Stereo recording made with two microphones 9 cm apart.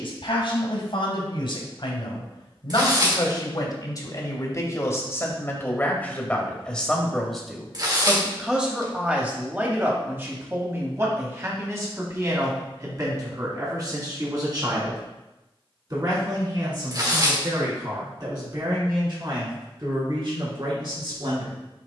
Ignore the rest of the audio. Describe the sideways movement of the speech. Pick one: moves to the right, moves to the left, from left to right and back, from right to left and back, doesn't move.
moves to the right.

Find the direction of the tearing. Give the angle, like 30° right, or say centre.
40° right.